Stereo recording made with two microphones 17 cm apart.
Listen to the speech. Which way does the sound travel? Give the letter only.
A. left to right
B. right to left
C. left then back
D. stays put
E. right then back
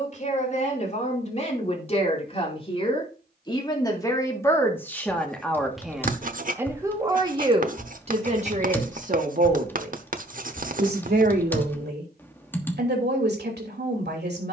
A.